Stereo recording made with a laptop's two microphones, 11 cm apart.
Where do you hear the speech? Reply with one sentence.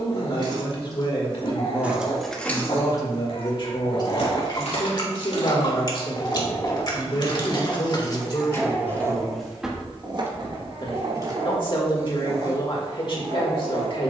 In this clip you hear the speech on the left.